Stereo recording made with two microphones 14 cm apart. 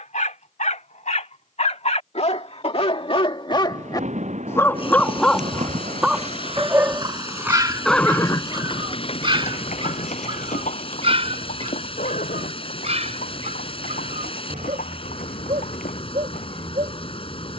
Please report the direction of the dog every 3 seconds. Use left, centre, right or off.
left, left, right, right, right, right.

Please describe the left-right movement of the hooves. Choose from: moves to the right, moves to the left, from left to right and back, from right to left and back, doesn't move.
moves to the left.